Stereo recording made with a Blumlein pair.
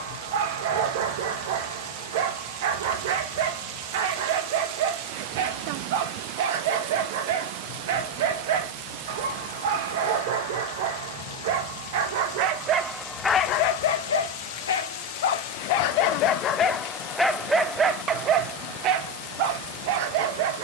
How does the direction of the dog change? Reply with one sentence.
You can hear the dog move from right to left and back again.